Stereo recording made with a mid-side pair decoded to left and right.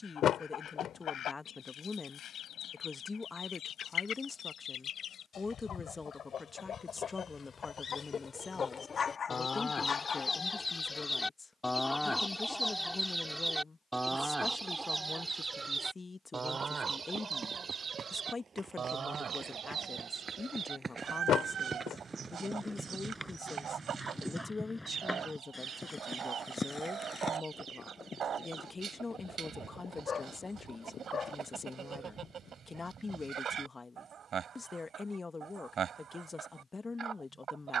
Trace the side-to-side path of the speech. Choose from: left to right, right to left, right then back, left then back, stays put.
stays put.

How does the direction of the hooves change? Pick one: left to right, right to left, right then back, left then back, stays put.
right to left.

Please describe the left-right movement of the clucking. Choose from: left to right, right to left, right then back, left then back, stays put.
left to right.